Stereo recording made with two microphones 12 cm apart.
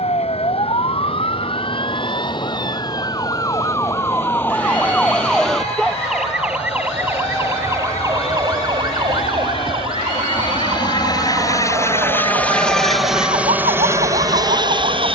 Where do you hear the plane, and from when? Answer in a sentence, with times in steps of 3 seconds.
You can hear the plane on the left from 0 s and in the centre from 12 s.